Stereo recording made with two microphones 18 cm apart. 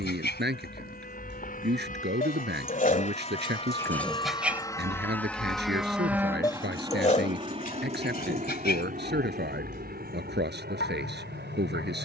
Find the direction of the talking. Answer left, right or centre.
right.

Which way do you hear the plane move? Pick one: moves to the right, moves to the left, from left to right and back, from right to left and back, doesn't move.
moves to the right.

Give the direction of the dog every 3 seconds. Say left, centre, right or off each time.
left, centre, left, left.